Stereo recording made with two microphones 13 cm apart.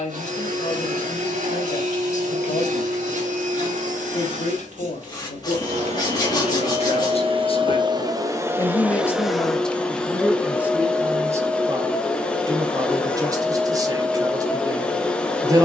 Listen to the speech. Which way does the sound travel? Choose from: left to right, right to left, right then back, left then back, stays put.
left to right.